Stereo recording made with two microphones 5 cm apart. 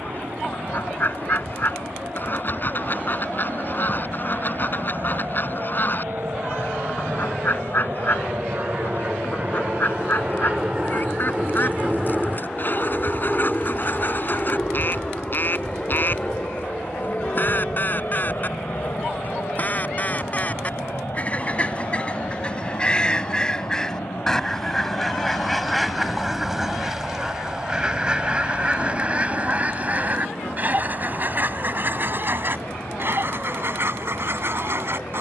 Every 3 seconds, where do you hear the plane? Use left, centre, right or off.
right, right, right, right, centre, left, left, left, left, left, left, left.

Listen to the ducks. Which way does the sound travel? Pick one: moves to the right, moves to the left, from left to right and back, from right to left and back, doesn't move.
moves to the right.